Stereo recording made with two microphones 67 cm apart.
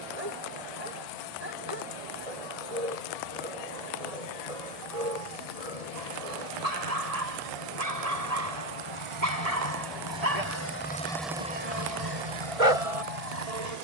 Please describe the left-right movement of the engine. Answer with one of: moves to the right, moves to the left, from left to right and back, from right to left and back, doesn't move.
moves to the right.